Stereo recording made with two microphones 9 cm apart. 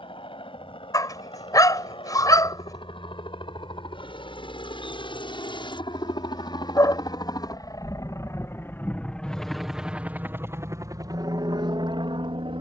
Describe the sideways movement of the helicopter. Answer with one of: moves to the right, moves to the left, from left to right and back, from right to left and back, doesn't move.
moves to the right.